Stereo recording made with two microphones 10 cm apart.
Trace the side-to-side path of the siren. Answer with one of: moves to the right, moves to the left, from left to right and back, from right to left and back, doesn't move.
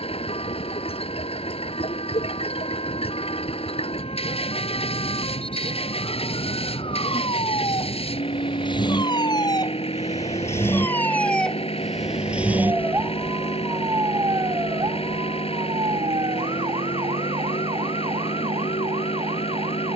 moves to the right.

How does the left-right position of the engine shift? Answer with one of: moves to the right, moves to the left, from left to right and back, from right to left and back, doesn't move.
doesn't move.